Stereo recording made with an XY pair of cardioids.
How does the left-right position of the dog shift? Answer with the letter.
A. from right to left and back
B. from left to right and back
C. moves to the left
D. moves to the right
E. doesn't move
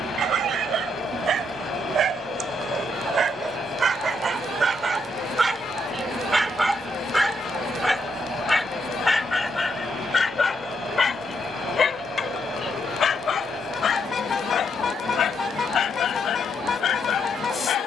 C.